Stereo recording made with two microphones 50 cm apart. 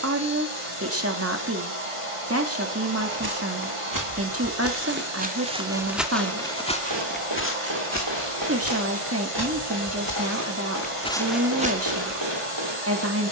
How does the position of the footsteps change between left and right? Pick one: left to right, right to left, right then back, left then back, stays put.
left then back.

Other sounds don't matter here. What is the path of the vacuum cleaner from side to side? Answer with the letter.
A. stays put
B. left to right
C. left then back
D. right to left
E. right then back
A.